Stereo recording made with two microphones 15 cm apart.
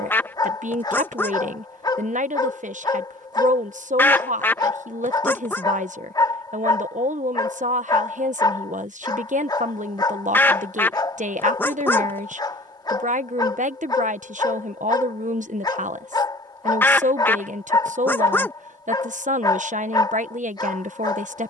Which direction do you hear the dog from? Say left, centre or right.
left.